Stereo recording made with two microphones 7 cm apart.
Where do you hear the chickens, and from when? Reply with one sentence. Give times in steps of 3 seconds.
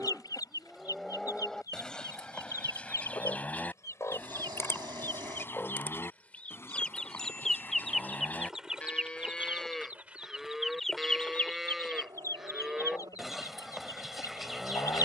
In this clip you hear the chickens on the left from 0 s, in the centre from 6 s and on the left from 12 s.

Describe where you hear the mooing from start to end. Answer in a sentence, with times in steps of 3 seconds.
In this clip you hear the mooing in the centre from 0 s, on the left from 3 s and in the centre from 9 s.